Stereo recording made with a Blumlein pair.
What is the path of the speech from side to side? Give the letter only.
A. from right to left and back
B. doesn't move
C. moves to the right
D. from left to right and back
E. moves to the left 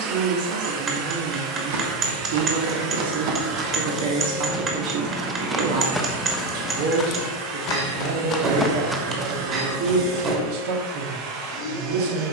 B.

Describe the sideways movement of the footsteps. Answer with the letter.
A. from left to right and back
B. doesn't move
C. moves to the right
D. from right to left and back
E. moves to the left
D.